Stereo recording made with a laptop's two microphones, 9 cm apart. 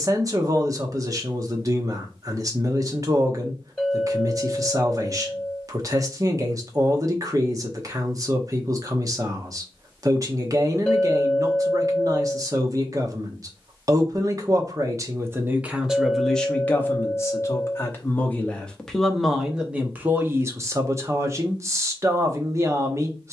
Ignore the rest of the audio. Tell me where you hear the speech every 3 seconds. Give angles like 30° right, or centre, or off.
40° right, 40° right, 40° right, 40° right, 40° right, 10° left, 10° right, 30° right.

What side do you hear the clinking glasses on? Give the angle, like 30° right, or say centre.
10° left.